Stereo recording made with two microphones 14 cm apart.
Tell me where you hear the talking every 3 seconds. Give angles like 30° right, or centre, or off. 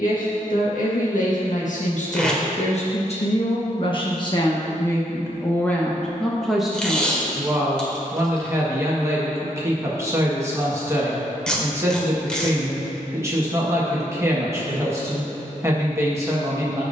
60° left, 30° left, 10° right, 20° right, 20° right, 20° right.